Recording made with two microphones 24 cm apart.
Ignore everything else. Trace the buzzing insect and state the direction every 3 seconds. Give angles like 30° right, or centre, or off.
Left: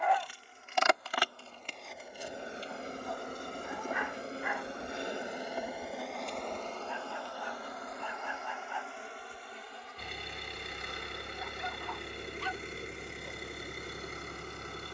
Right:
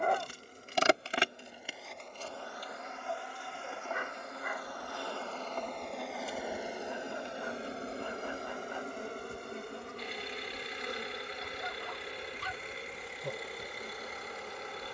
10° right, 30° left, 20° right, 50° right, 60° right.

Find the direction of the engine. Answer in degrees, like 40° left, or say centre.
50° left.